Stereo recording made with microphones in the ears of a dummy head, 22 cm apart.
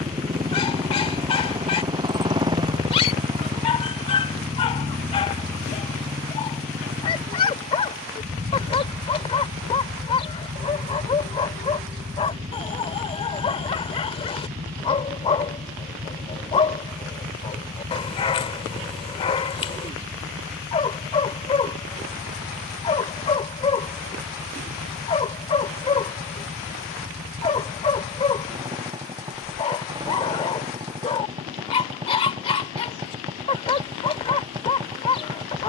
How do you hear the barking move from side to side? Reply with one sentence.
You can hear the barking stay put.